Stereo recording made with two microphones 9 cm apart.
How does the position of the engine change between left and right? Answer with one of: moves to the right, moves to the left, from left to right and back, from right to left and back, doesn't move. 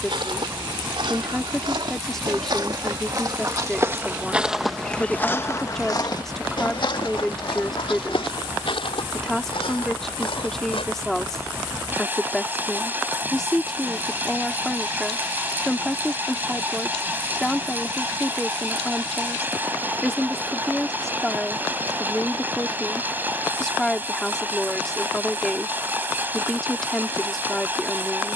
doesn't move.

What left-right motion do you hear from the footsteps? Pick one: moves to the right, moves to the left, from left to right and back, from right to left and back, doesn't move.
moves to the left.